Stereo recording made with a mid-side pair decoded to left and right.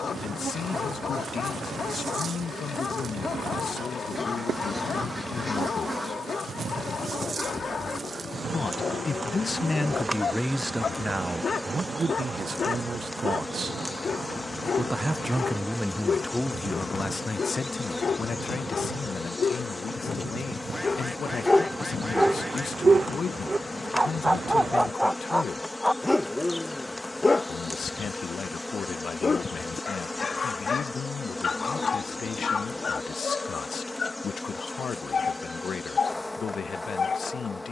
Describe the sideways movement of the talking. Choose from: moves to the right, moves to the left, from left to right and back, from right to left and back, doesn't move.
from left to right and back.